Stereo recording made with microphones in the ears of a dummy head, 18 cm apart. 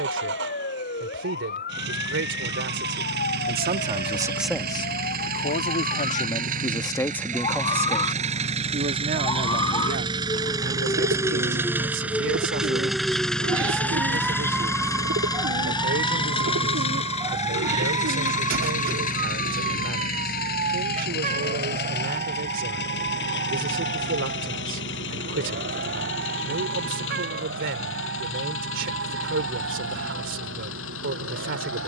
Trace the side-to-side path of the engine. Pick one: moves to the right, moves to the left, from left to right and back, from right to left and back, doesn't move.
moves to the left.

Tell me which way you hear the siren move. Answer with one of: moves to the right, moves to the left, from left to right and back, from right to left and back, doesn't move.
moves to the right.